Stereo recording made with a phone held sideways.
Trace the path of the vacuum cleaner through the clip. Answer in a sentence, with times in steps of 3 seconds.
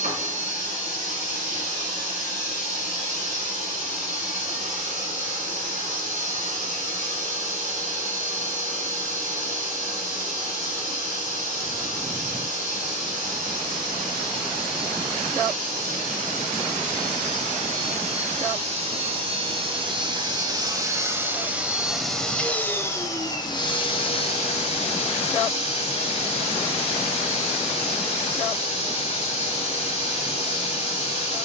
In this clip you hear the vacuum cleaner on the right from 0 s, in the centre from 21 s and on the left from 24 s.